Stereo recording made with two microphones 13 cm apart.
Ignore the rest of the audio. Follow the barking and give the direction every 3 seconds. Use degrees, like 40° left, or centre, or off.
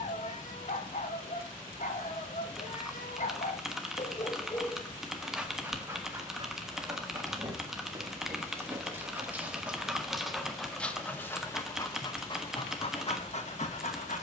60° left, 30° left, 20° right, centre, 50° left.